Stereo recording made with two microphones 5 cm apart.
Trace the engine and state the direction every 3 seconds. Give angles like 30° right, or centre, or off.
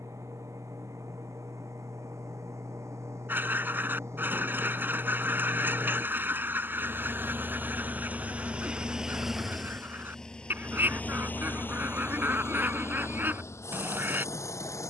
70° right, 60° right, 30° right, 20° left, 60° left.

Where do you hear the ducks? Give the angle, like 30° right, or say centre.
40° right.